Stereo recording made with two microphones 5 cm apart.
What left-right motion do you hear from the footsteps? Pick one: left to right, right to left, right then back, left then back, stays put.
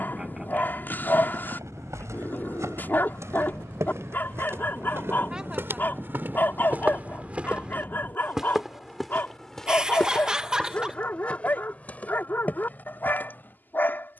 right to left.